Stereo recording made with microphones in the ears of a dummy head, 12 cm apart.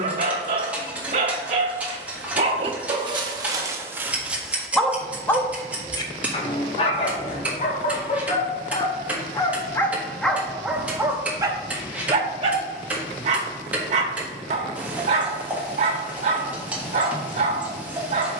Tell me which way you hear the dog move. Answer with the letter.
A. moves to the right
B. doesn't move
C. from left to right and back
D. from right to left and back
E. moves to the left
D.